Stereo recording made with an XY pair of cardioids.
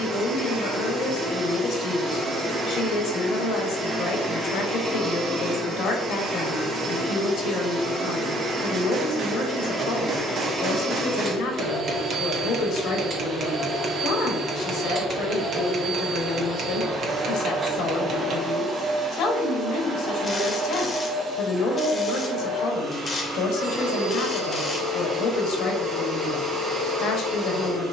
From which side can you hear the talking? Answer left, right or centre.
left.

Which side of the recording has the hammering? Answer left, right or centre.
right.